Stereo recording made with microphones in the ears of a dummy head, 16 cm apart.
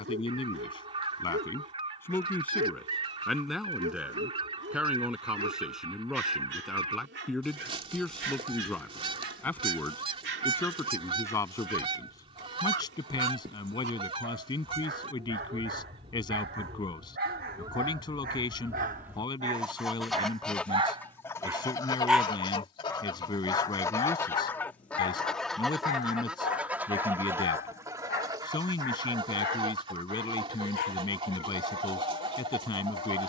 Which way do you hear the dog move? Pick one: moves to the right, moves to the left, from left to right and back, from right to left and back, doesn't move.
moves to the left.